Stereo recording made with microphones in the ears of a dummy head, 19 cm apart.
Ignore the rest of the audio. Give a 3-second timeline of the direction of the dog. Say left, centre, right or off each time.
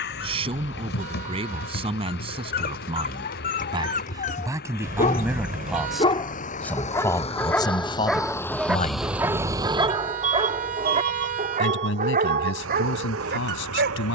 left, left, centre, right, right.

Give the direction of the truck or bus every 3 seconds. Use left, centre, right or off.
left, left, left, right, right.